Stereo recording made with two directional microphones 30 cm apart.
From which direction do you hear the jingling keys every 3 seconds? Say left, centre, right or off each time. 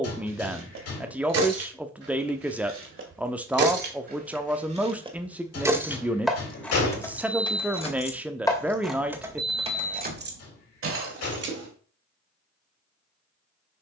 right, right, centre, right, off.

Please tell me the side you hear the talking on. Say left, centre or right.
centre.